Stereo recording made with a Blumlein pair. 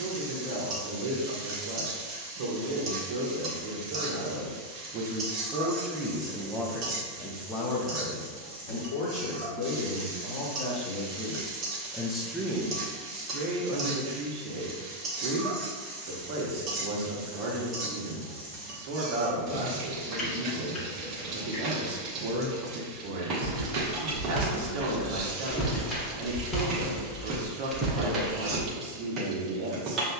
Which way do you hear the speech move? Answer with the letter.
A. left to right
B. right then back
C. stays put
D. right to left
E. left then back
E.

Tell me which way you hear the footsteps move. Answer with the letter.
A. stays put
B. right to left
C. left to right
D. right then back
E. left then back
E.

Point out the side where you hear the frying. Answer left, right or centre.
right.